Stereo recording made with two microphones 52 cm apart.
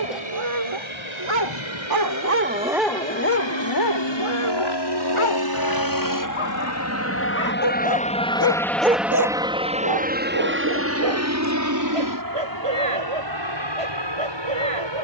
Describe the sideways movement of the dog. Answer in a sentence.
You can hear the dog move from right to left and back again.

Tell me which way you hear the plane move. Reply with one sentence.
You can hear the plane move to the right.